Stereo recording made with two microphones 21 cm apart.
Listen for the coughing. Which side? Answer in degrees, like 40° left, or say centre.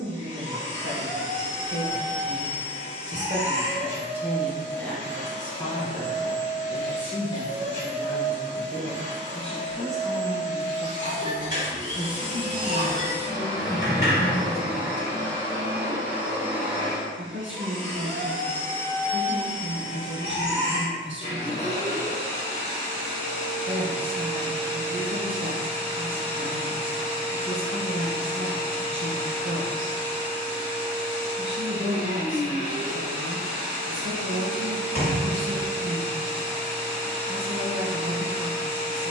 40° left.